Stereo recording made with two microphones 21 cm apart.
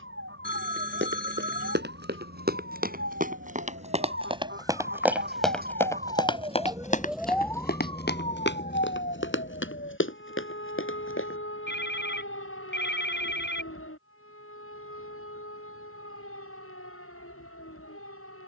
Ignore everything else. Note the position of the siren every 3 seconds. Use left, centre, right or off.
right, right, centre, left, left, left.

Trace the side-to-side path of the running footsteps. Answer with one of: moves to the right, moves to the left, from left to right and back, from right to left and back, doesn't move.
moves to the left.